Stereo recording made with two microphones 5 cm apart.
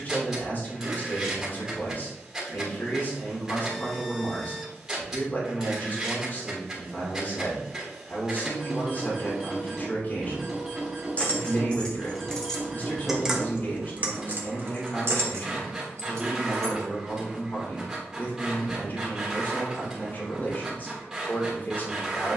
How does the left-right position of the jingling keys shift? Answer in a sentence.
In this clip you hear the jingling keys move to the right.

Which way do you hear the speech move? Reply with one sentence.
You can hear the speech stay put.